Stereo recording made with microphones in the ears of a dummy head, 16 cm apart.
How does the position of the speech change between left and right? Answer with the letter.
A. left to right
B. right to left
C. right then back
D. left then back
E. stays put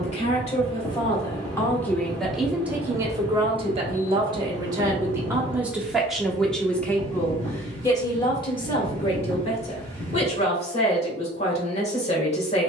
C.